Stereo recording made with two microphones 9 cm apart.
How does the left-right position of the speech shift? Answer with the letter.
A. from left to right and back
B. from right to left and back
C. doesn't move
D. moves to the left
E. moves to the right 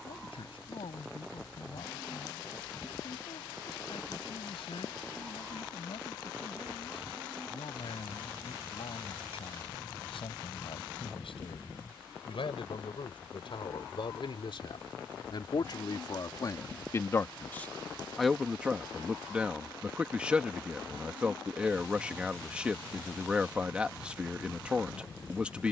E.